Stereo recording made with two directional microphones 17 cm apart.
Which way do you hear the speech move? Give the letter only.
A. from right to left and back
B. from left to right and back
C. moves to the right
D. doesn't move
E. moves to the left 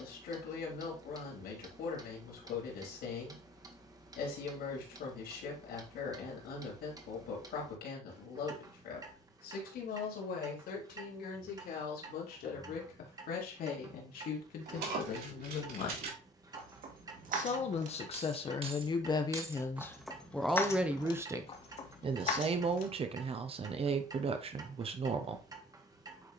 C.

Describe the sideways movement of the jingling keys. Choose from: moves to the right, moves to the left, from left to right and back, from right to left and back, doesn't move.
moves to the left.